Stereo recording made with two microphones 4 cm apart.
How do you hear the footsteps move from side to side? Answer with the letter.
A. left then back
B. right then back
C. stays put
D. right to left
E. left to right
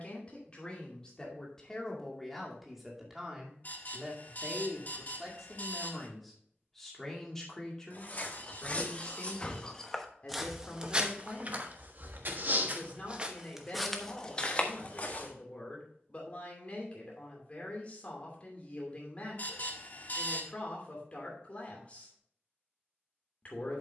B.